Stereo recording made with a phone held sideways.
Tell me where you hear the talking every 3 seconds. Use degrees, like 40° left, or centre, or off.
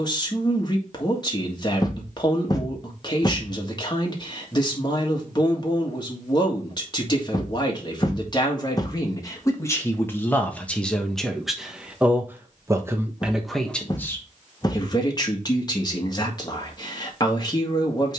30° left, 30° left, 30° left, 10° left, centre, 30° left.